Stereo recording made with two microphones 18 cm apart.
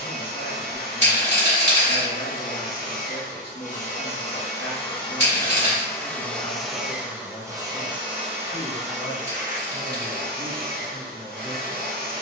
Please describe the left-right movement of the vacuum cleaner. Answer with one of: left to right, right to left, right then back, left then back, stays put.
left to right.